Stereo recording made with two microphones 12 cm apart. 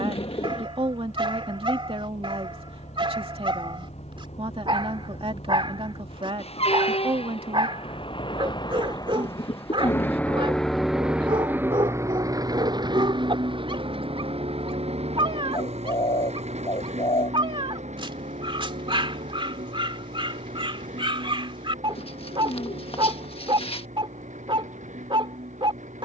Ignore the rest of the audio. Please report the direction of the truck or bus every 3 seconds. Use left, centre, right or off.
left, left, left, centre, right, right, right, right, right.